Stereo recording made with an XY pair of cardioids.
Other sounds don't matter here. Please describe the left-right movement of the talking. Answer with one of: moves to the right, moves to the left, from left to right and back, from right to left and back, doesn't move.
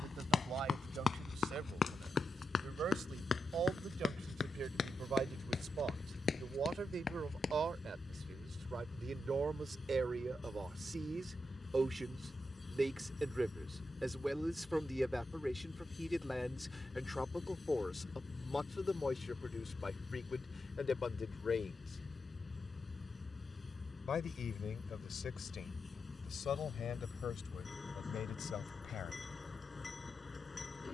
moves to the left.